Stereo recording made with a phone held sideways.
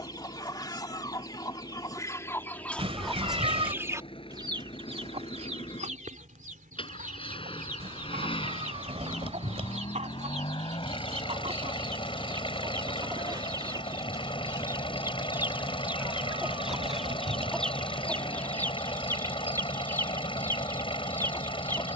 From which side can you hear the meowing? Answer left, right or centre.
right.